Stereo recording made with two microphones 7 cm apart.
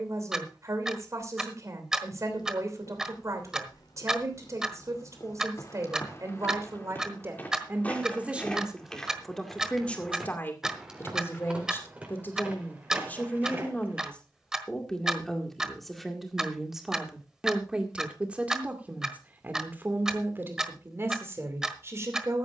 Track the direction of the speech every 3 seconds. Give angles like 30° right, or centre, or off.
50° right, 50° right, 30° right, 20° left, 20° left, centre, 30° right, 40° right.